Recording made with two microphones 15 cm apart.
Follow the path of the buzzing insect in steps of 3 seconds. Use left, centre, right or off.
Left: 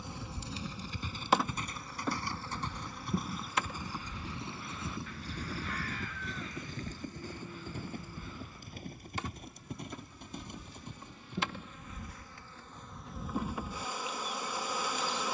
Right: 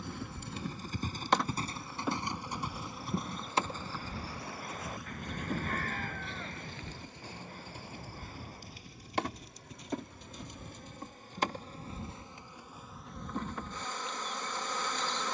centre, right, right, right, centre.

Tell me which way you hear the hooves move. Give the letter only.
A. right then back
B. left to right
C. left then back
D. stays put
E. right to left
E.